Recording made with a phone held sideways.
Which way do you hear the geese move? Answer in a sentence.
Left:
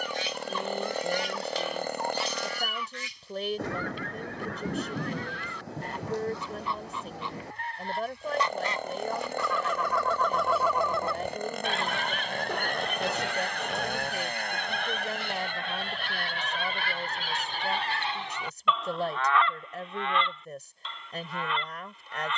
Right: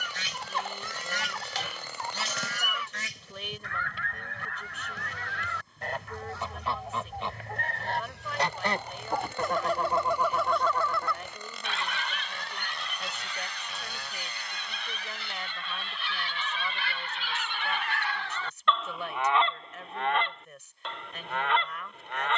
In this clip you hear the geese go left and come back.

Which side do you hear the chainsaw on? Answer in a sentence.
In this clip you hear the chainsaw on the left.